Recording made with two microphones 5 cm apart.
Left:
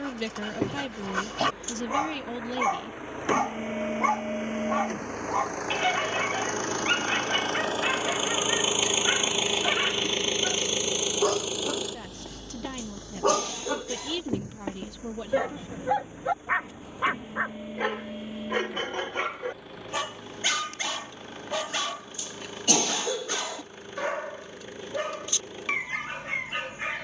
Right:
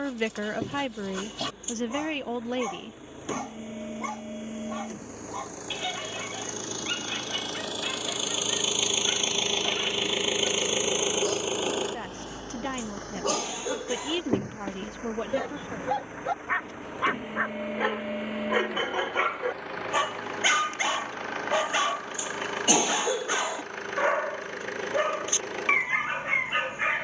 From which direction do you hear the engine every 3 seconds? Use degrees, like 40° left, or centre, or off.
80° left, 70° left, 40° left, 10° right, 50° right, 70° right, 70° right, 80° right, 80° right.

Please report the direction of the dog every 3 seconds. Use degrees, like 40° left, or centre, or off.
60° left, 60° left, 60° left, 60° left, 40° left, 10° left, 20° right, 30° right, 30° right.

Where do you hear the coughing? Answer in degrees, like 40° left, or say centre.
20° right.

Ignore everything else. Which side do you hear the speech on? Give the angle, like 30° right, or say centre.
40° right.